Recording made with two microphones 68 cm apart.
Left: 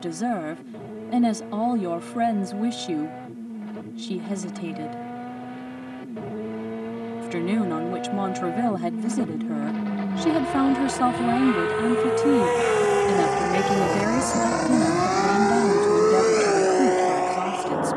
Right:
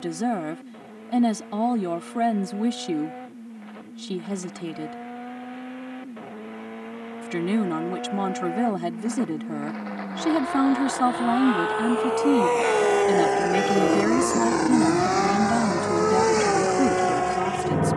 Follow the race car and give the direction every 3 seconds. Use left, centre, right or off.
left, left, left, left, left, right.